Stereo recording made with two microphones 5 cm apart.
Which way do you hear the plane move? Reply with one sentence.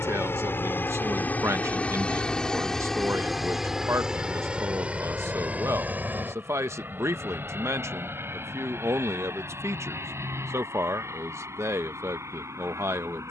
You can hear the plane travel towards the right.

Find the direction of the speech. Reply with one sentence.
You can hear the speech on the right.